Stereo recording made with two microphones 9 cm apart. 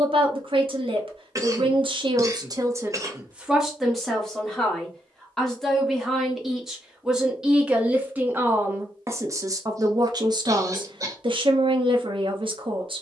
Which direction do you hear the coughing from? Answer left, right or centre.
right.